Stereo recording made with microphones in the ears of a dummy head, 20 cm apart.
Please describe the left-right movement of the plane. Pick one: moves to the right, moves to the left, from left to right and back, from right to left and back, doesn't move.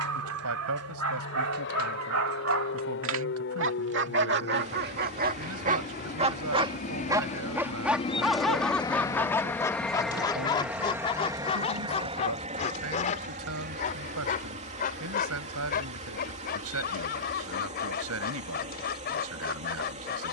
moves to the right.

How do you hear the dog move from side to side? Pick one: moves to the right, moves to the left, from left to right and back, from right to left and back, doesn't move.
moves to the left.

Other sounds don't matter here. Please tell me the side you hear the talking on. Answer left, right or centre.
right.